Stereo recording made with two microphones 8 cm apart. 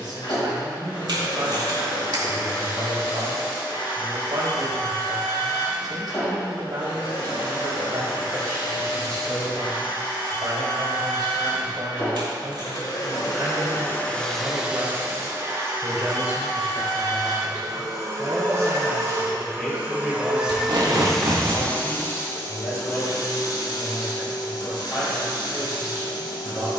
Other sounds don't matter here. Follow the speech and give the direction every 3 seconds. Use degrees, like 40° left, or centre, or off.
60° right, 60° right, 60° right, 60° right, 40° right, 20° right, centre, 20° left, 30° left.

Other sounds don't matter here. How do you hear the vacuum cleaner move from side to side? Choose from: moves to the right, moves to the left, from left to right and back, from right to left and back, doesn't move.
from left to right and back.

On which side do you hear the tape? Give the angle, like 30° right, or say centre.
70° right.